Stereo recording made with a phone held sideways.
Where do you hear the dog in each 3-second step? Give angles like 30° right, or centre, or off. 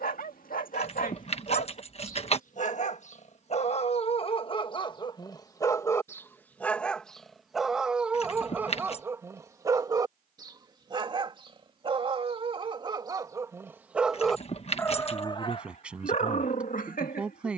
60° left, 30° left, centre, 30° right, 20° right, 50° left.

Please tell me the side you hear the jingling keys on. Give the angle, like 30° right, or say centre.
40° left.